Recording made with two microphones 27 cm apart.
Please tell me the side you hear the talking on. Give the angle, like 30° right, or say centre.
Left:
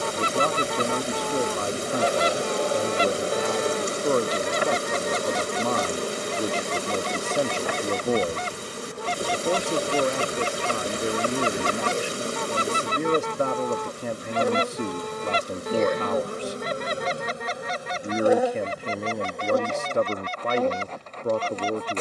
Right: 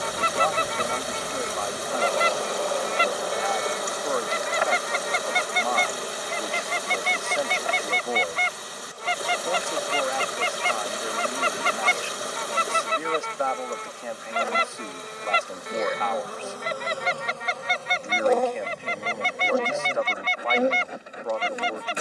40° left.